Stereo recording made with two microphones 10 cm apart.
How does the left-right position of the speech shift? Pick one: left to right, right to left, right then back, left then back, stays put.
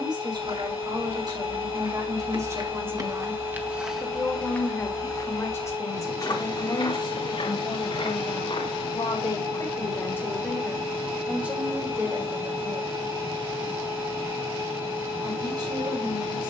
left then back.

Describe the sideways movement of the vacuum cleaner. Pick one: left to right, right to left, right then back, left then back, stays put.
stays put.